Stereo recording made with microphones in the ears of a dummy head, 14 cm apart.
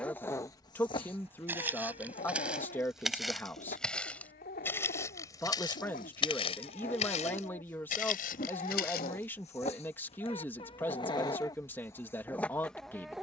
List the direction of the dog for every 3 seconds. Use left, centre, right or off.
left, left, left, left, centre.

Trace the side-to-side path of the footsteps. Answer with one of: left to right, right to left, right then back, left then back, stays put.
right to left.